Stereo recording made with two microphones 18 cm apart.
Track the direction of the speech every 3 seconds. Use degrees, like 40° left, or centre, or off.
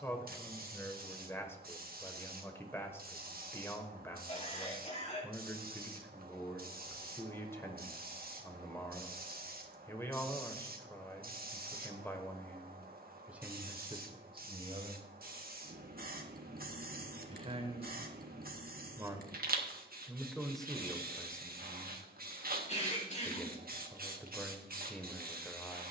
10° left, 10° left, 10° left, 10° left, 10° right, 30° right, 10° right, 10° left, 10° left.